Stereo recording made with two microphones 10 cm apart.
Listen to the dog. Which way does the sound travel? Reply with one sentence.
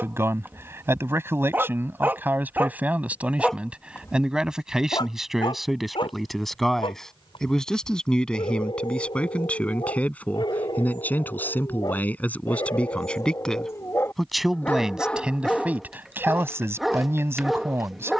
In this clip you hear the dog go left and come back.